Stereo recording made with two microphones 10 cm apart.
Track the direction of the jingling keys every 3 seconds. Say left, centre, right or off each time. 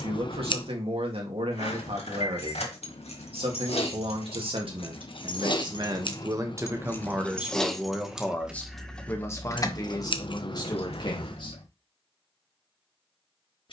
left, left, centre, left, off.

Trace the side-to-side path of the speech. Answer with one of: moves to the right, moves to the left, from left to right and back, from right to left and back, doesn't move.
moves to the left.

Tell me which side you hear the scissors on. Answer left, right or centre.
left.